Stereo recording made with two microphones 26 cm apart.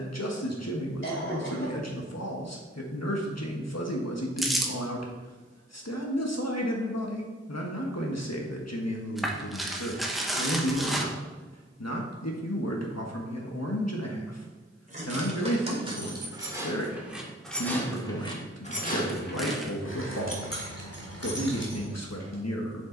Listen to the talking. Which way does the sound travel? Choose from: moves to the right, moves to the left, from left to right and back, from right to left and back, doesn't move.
doesn't move.